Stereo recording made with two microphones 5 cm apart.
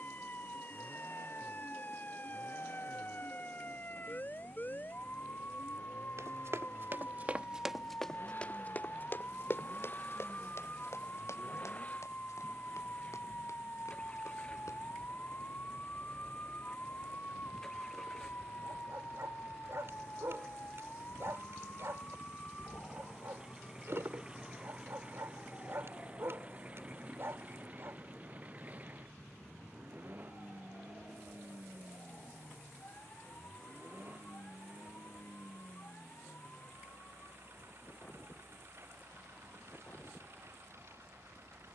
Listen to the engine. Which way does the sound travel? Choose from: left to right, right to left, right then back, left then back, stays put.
left to right.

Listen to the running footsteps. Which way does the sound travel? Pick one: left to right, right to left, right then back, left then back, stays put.
right to left.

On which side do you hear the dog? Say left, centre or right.
right.